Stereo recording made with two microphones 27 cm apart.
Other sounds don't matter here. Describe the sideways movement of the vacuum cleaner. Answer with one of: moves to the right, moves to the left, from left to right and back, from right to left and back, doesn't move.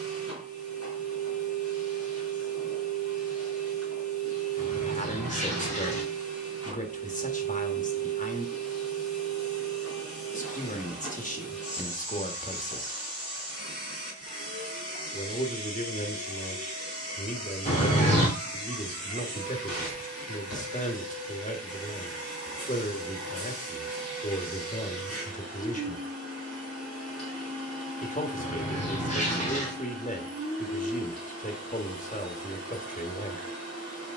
doesn't move.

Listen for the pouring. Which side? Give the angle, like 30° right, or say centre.
30° left.